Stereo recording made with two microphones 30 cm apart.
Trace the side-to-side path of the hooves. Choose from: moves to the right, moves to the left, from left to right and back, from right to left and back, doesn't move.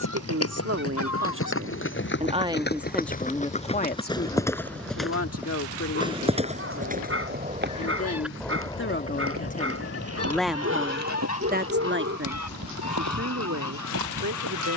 moves to the right.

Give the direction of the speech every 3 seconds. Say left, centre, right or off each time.
right, left, left, centre, right.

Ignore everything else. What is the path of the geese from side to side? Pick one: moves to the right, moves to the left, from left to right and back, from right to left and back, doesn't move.
from left to right and back.